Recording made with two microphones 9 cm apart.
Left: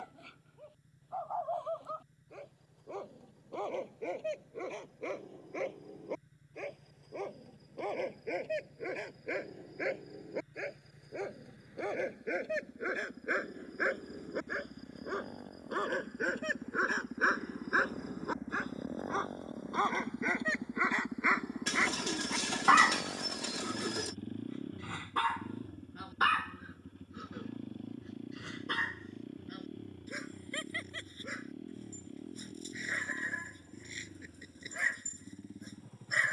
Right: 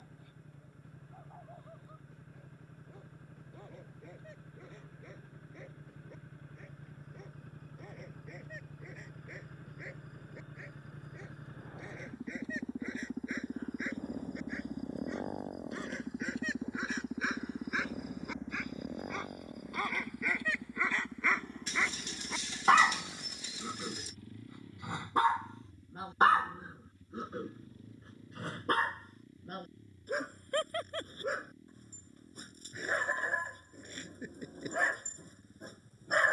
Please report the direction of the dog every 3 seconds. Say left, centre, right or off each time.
left, left, left, left, left, left, left, centre, right, right, right, right.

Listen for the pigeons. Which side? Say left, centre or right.
left.